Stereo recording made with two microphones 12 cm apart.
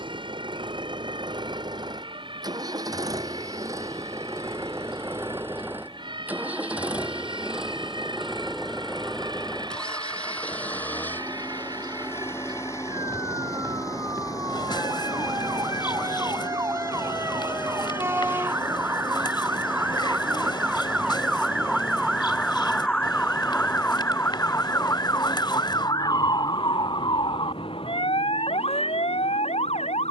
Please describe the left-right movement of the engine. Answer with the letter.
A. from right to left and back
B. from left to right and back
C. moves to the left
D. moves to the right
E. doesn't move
C.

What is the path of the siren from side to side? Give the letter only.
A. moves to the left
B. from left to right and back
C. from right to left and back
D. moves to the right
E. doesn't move
A.